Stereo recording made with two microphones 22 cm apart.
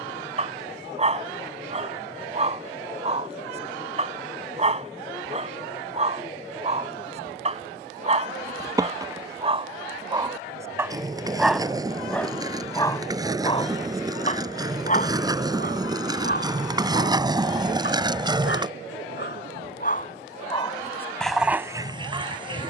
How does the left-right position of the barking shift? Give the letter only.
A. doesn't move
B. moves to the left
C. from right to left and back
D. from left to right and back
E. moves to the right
C.